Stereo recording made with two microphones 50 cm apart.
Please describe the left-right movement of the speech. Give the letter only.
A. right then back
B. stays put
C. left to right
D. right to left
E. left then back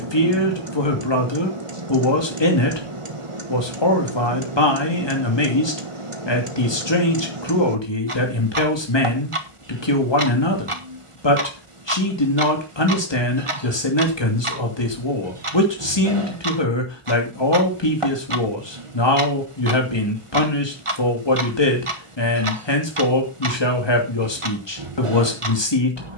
B.